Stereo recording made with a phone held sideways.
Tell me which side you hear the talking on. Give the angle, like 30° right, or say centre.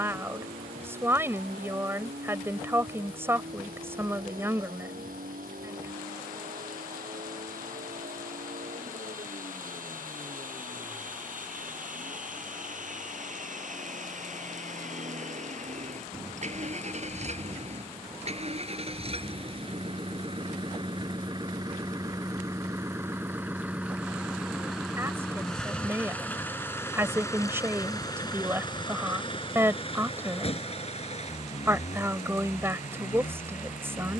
20° right.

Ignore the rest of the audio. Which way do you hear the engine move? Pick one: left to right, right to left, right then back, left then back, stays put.
right to left.